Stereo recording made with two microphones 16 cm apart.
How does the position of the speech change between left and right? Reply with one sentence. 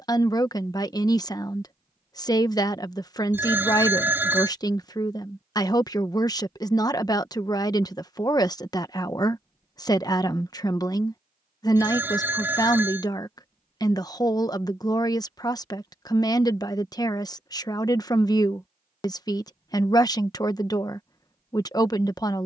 You can hear the speech stay in one place.